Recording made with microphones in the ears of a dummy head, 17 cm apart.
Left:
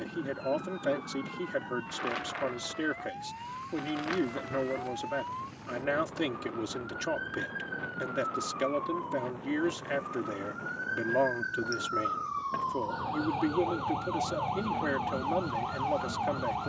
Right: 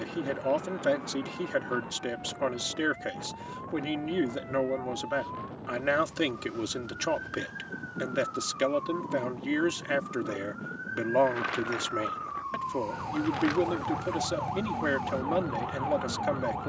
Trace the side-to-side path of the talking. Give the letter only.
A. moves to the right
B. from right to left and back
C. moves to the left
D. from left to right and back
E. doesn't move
E.